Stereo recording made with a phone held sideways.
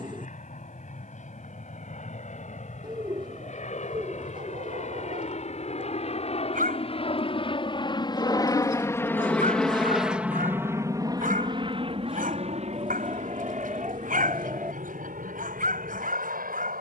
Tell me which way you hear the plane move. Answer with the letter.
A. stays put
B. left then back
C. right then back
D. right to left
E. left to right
E.